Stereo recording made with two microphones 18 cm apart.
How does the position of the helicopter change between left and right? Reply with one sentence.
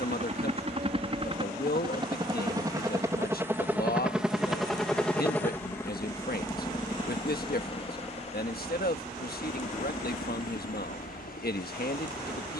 You can hear the helicopter travel towards the left.